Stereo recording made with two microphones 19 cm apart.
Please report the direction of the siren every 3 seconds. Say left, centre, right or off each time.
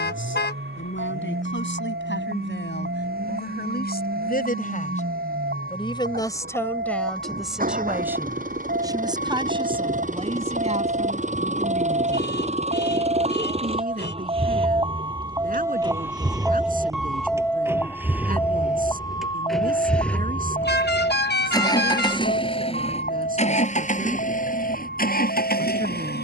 right, right, right, right, right, centre, left, left, left.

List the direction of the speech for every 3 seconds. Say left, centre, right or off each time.
left, left, centre, right, right, right, right, right, right.